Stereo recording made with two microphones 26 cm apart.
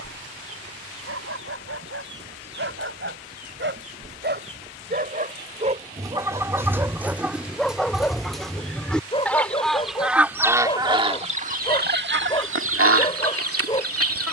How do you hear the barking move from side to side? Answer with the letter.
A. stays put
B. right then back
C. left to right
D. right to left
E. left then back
D.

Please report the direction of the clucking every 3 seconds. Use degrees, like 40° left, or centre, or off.
50° right, 30° right, centre, 20° right, 60° right.